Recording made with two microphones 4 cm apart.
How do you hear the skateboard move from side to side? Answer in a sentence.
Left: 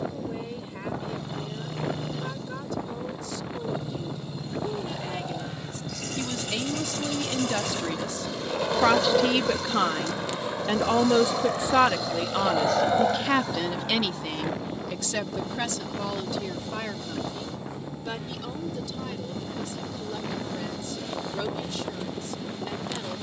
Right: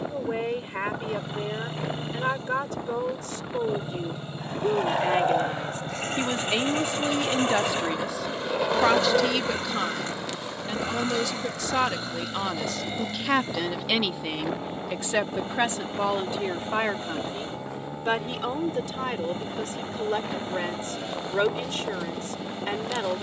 You can hear the skateboard go from the right side to the left.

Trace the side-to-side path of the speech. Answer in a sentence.
You can hear the speech move from right to left and back again.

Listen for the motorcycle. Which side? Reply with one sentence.
In this clip you hear the motorcycle on the right.